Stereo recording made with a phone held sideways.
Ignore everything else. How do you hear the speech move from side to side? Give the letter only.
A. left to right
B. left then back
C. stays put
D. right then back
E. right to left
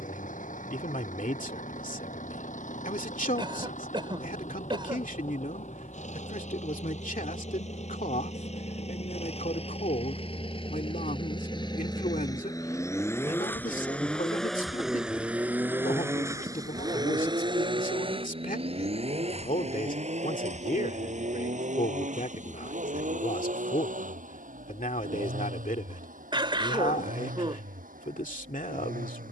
C.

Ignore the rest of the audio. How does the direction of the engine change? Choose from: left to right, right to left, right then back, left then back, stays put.
left to right.